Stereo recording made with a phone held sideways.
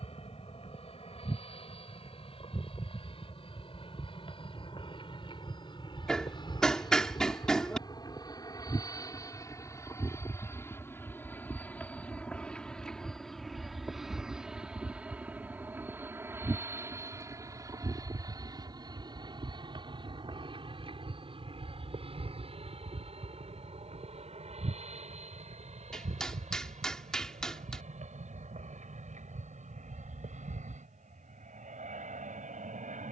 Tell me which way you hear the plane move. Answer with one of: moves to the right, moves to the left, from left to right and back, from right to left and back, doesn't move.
moves to the right.